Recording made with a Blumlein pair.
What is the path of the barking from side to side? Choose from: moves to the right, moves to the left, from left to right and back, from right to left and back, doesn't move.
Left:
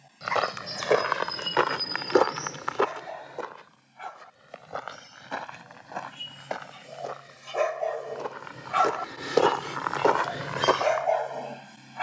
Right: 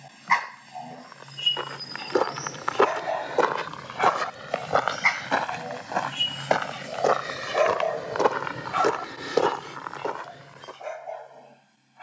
moves to the left.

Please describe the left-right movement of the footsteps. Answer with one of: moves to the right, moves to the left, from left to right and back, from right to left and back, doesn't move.
from left to right and back.